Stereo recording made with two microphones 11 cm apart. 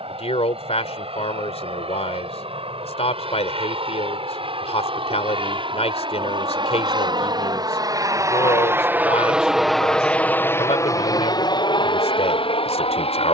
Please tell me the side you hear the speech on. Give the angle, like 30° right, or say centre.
70° left.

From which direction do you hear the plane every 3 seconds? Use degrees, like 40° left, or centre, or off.
70° right, 60° right, 40° right, 20° left, 60° left.